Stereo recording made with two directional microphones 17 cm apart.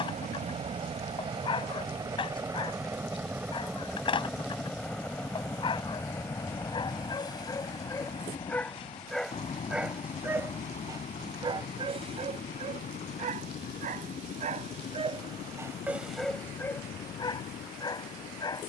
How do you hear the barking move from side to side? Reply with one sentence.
In this clip you hear the barking go right and come back.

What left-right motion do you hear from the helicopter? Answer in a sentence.
You can hear the helicopter go from the right side to the left.